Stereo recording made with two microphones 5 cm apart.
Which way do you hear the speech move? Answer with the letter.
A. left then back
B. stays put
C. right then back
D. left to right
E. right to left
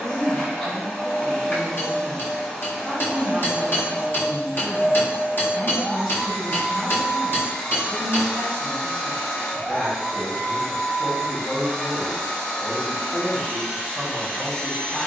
B.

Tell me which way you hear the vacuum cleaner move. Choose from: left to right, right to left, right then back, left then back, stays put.
stays put.